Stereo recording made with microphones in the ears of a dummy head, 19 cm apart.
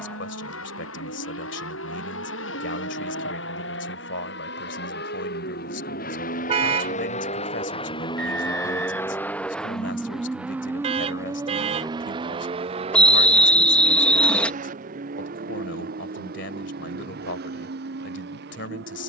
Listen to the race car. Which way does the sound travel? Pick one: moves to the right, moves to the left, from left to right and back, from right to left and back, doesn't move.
moves to the right.